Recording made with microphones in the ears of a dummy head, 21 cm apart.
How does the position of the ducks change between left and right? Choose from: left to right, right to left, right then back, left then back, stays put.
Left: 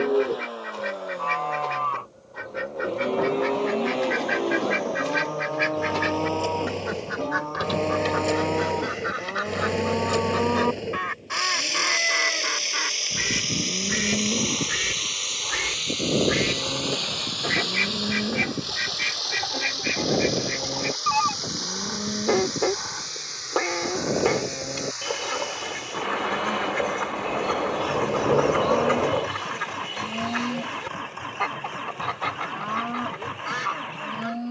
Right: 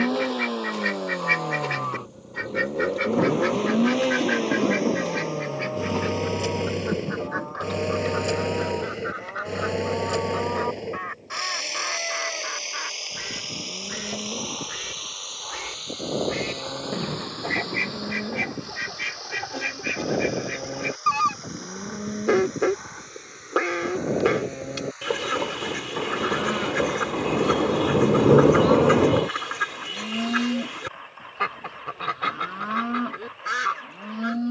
left then back.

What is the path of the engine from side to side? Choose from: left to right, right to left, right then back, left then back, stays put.
right to left.